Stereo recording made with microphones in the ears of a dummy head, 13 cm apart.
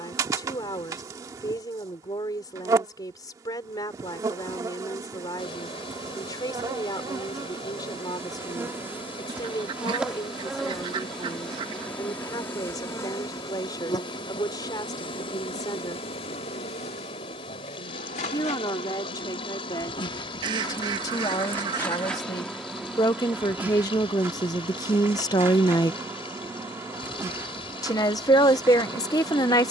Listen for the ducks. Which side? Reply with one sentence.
In this clip you hear the ducks on the right.